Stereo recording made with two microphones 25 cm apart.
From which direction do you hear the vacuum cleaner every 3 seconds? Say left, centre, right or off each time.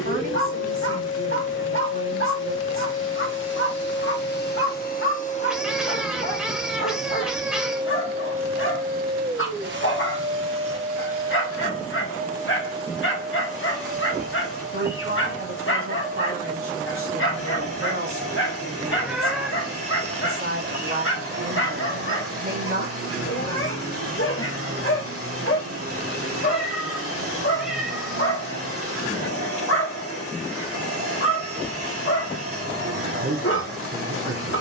left, left, centre, right, right, right, right, right, right, right, right, right.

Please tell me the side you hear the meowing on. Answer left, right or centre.
centre.